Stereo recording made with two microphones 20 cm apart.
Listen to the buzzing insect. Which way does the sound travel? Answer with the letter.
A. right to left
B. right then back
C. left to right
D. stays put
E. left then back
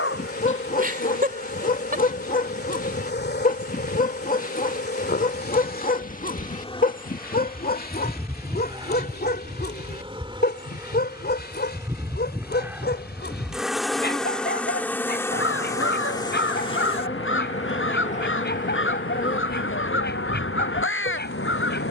B.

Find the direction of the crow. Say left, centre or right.
left.